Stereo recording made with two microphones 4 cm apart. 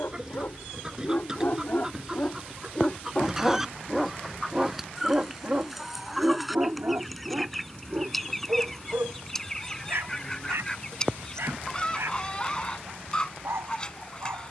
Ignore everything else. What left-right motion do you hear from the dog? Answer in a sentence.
In this clip you hear the dog move from left to right.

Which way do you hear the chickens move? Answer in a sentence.
In this clip you hear the chickens move from right to left.